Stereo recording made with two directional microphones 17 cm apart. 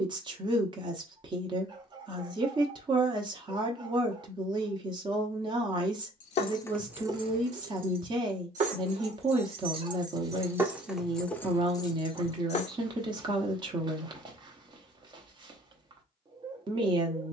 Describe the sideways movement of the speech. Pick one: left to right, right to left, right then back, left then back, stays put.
stays put.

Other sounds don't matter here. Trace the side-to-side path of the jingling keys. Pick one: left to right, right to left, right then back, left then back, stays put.
right then back.